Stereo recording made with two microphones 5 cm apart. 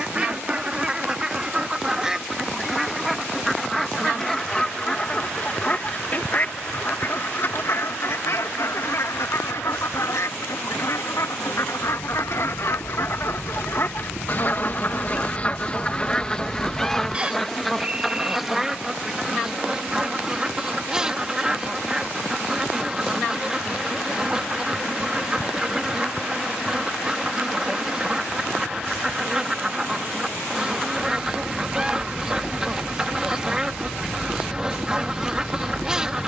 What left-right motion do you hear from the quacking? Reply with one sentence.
You can hear the quacking go left and come back.